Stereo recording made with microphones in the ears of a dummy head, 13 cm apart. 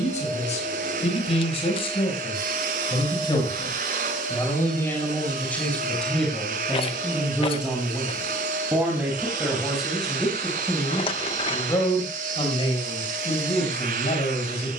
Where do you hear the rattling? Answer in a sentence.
You can hear the rattling on the left.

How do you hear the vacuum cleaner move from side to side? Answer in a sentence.
In this clip you hear the vacuum cleaner stay put.